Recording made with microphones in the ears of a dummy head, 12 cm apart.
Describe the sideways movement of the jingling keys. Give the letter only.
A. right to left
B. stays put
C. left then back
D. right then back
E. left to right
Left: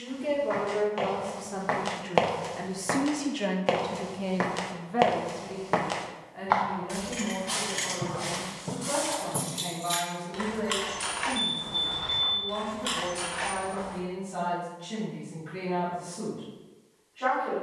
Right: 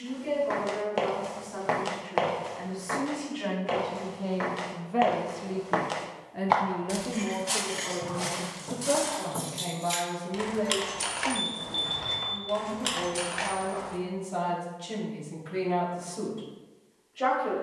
E.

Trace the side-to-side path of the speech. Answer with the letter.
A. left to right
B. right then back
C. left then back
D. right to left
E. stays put
A.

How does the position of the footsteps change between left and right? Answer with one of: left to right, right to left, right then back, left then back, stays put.
left then back.